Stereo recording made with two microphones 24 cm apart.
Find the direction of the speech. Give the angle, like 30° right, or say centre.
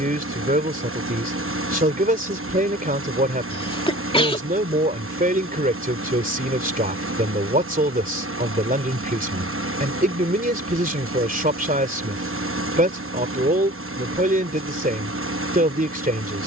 30° right.